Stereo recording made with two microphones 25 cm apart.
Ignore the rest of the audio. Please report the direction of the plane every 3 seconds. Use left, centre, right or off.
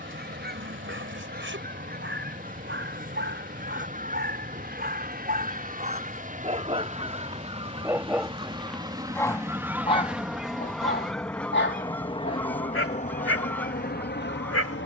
right, right, right, centre, left.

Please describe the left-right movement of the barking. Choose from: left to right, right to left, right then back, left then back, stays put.
right to left.